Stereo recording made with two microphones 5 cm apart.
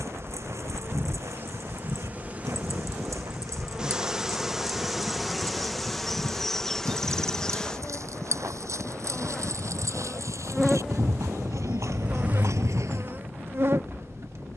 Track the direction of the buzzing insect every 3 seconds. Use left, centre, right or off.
right, centre, centre, centre, right.